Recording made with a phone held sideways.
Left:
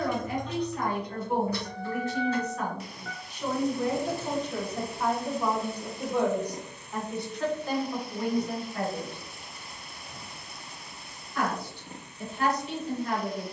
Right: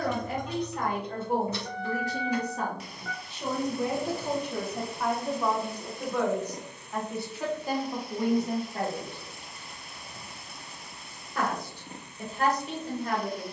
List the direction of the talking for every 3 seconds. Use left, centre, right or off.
right, centre, centre, right, right.